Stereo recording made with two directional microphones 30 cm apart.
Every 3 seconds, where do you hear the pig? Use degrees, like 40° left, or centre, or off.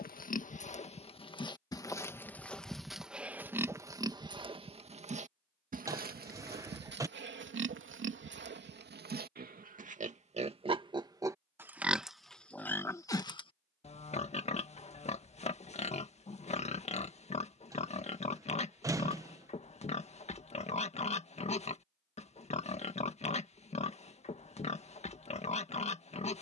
10° left, 20° right, 40° right, 20° right, 10° left, 20° left, 20° left, 20° left, 20° left.